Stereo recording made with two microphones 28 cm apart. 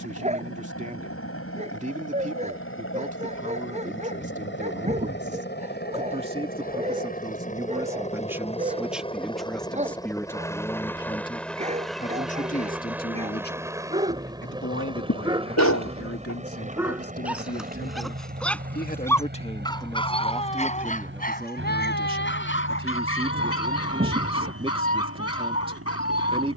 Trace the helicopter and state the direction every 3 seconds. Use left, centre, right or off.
left, left, left, centre, centre, right, right, right, right.